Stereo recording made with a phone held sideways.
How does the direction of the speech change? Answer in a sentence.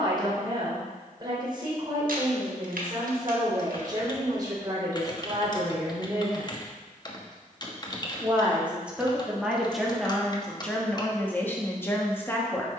You can hear the speech go from the right side to the left.